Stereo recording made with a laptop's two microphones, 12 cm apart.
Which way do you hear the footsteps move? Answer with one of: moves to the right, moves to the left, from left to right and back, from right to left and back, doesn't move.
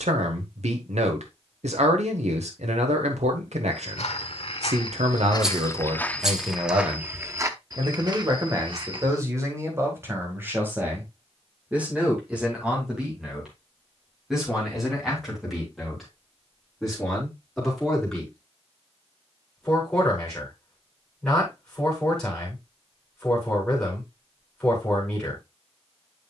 moves to the right.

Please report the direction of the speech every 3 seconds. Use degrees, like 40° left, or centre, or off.
80° right, 70° right, 40° right, 20° right, 10° right, centre, centre, 10° left, 10° left.